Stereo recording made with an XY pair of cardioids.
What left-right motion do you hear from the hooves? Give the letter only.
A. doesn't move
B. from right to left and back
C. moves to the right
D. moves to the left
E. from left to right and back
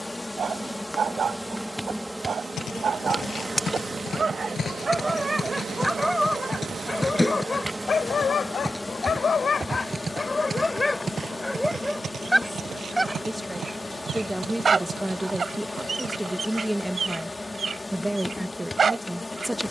C.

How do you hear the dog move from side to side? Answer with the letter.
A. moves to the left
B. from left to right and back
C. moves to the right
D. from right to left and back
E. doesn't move
D.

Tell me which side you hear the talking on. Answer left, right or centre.
centre.